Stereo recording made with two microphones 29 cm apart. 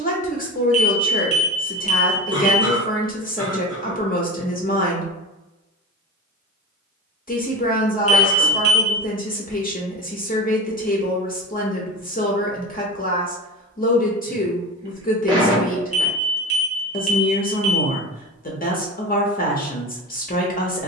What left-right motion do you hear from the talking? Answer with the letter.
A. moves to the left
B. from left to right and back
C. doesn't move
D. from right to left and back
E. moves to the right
C.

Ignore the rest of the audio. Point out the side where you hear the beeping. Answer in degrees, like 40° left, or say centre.
50° left.